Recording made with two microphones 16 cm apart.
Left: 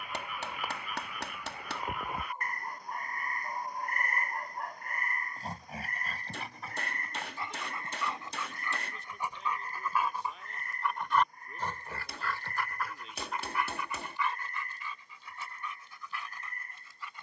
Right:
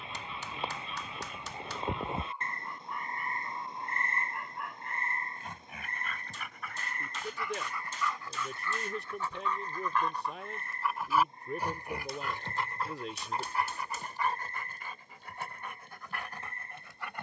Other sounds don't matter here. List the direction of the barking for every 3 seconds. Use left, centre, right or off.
left, left, left, centre, right, right.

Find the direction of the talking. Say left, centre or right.
right.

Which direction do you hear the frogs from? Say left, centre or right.
right.